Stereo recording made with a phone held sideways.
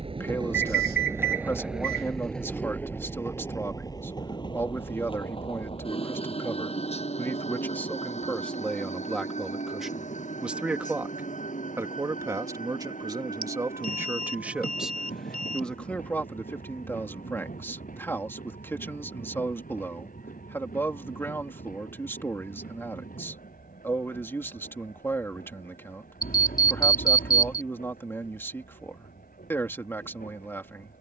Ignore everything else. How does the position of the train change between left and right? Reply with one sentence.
In this clip you hear the train move from right to left.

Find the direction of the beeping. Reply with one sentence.
In this clip you hear the beeping on the left.